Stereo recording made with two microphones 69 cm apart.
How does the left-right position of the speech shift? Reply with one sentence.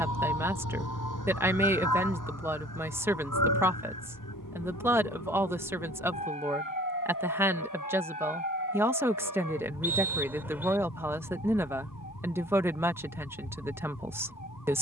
In this clip you hear the speech stay in one place.